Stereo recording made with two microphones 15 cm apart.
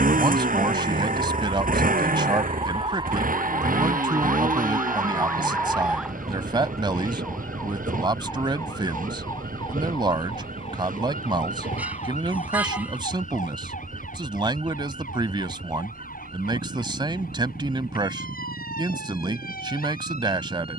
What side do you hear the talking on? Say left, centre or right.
right.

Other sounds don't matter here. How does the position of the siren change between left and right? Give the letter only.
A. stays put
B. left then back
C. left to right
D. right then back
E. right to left
E.